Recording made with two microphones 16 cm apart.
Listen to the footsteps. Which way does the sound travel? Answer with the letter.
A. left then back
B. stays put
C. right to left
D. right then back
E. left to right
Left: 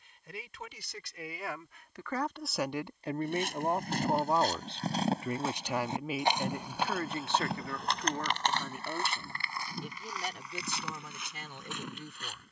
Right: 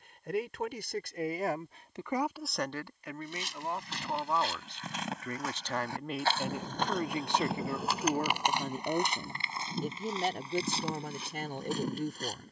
E.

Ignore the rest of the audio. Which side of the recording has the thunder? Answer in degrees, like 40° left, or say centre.
40° right.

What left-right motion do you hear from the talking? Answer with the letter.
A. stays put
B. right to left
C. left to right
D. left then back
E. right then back
D.